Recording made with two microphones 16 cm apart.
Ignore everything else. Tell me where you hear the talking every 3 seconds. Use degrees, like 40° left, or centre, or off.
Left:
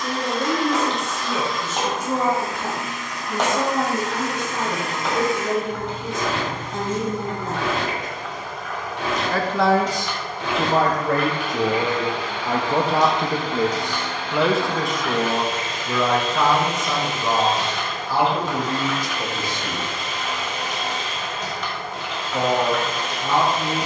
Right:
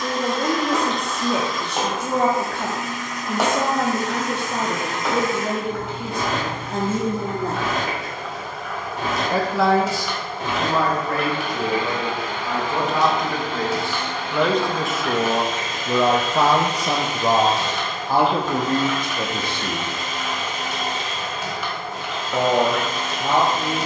70° right, 70° right, 70° right, 30° left, 20° left, 30° right, 60° right, 70° right.